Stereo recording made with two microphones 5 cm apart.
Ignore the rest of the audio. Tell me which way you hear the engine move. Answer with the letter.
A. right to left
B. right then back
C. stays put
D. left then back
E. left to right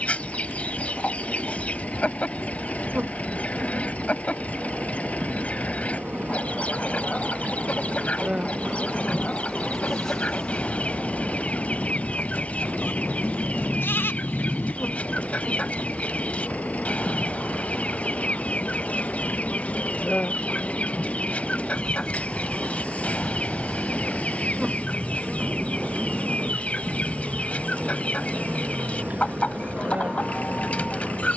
C.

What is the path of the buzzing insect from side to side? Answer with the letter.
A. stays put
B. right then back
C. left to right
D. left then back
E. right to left
D.